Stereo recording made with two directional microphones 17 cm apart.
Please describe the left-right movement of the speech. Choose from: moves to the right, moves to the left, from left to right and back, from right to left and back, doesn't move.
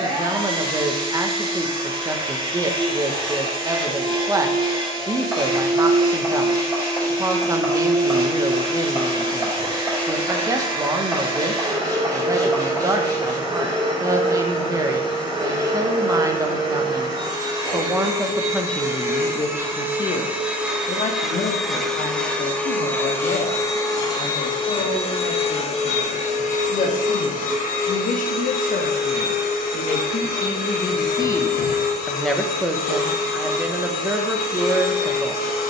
from right to left and back.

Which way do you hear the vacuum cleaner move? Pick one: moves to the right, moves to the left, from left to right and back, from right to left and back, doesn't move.
moves to the left.